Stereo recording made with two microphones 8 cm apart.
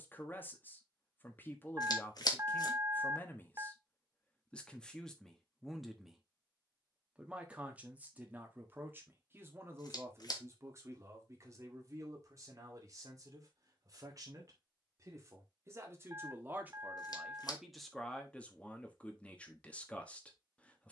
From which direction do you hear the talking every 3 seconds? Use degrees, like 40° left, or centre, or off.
20° left, 10° left, 20° right, 30° right, 40° right, 20° right, 10° left.